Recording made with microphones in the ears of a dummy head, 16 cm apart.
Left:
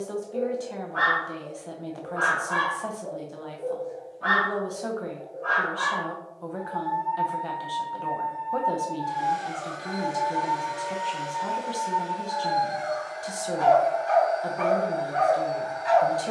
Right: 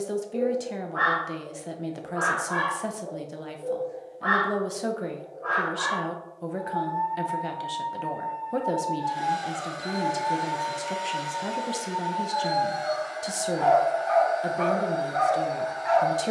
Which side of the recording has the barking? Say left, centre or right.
left.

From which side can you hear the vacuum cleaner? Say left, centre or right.
right.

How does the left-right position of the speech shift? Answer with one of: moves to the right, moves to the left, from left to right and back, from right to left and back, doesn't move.
doesn't move.